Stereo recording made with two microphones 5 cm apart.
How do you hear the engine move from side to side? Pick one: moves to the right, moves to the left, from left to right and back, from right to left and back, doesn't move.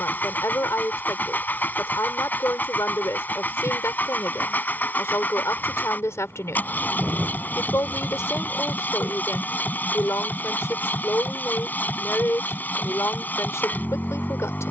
doesn't move.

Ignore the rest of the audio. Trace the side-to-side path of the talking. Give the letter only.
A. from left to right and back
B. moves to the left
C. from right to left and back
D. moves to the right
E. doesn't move
E.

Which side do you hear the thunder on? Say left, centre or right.
right.